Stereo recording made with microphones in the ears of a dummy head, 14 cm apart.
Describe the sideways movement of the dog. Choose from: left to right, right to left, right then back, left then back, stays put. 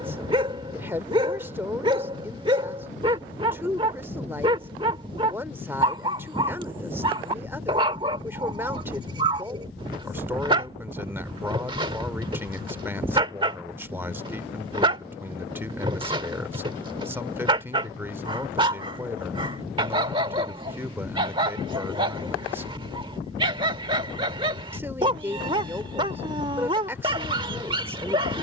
stays put.